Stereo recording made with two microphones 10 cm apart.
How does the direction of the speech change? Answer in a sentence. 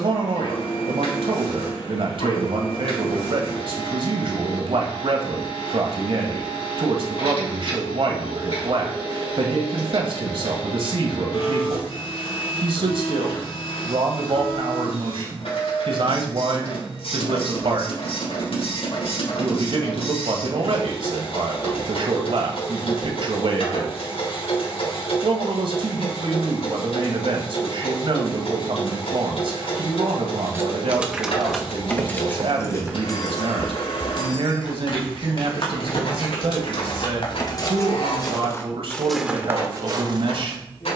In this clip you hear the speech stay put.